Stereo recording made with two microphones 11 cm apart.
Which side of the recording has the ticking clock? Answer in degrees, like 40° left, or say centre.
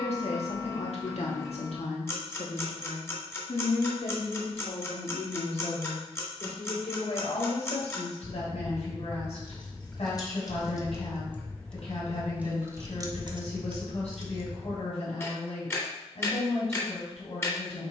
20° left.